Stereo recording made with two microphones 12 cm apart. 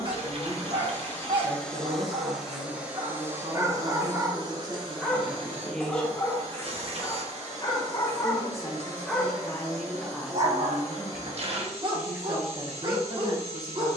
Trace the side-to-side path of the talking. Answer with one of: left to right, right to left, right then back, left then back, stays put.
left then back.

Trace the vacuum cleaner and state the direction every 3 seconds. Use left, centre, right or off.
centre, right, right, right, right.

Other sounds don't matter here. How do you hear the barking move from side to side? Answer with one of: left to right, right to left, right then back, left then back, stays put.
left then back.